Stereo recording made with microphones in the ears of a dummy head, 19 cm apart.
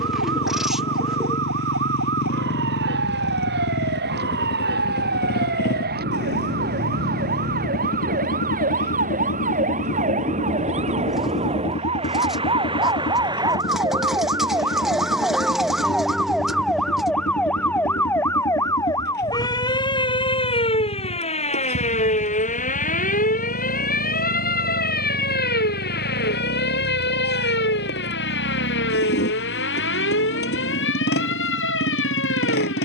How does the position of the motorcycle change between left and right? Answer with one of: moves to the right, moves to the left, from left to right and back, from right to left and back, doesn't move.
doesn't move.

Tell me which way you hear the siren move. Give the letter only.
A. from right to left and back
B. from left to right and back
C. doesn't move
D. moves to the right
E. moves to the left
E.